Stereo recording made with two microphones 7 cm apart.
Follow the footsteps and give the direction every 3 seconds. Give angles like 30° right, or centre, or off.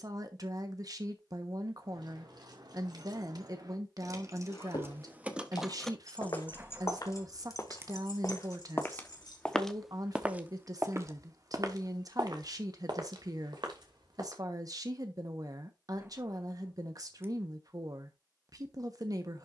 off, 70° left, 50° left, 20° right, 70° right, off, off.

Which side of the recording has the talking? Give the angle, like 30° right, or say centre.
50° right.